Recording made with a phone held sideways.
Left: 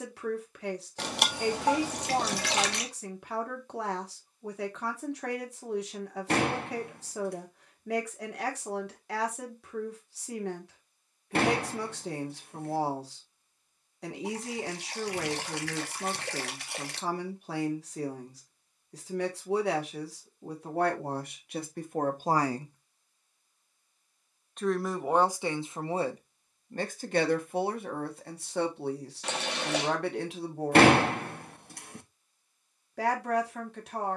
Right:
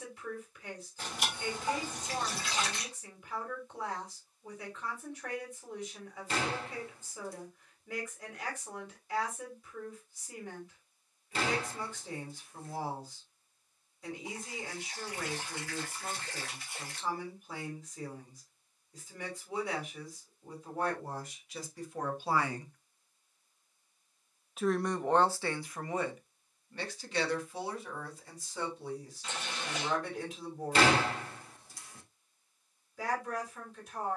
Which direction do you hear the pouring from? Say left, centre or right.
left.